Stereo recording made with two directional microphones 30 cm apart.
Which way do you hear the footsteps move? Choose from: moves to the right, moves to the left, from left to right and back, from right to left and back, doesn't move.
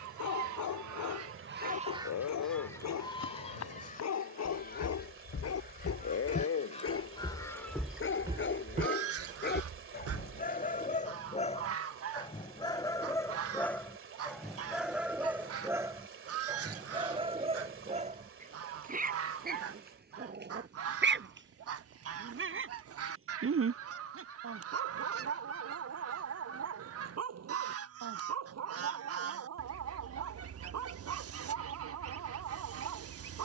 moves to the right.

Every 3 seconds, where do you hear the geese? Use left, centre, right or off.
right, left, centre, right, right, right, right, right, right, right, right.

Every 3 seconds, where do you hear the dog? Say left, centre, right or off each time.
left, left, left, left, centre, centre, right, right, right, right, right.